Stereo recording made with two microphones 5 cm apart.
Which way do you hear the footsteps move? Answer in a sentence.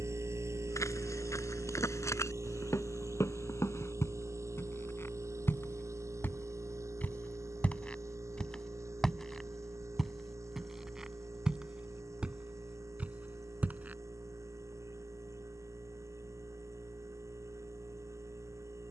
You can hear the footsteps move from left to right.